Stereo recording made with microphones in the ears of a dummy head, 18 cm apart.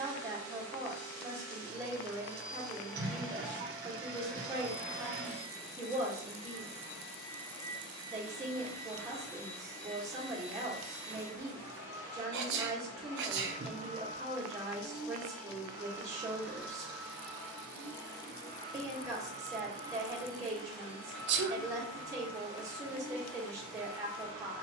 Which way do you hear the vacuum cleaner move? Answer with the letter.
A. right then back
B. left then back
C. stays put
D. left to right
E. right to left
A.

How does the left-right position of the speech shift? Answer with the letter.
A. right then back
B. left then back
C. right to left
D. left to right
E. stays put
E.